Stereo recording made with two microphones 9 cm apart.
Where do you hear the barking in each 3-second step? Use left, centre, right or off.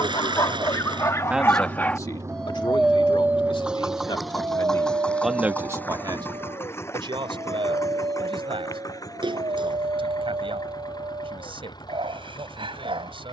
left, right, right, right, right.